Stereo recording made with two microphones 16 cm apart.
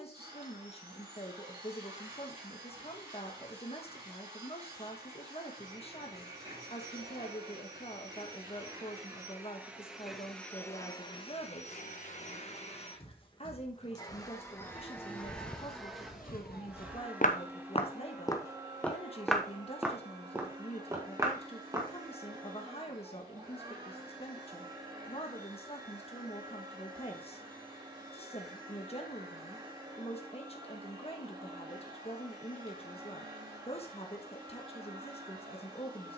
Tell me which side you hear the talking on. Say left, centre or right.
left.